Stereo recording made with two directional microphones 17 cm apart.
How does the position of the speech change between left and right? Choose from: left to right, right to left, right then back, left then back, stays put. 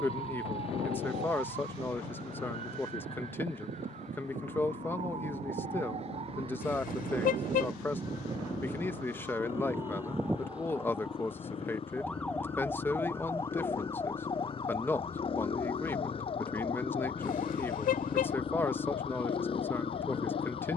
stays put.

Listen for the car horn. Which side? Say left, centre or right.
left.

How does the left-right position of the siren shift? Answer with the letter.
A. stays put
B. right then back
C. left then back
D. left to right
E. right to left
E.